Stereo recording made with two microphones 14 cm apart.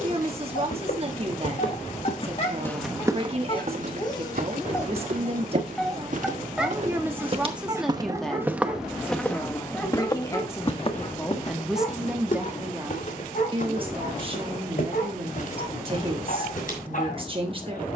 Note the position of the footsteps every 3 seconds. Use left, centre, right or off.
left, right, right, left, left, left.